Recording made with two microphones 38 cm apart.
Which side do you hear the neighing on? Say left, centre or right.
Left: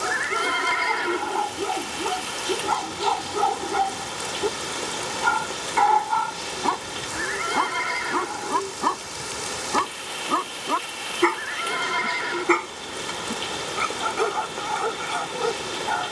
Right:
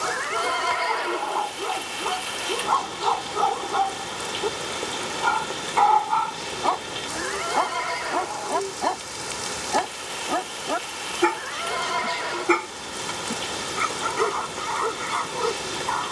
left.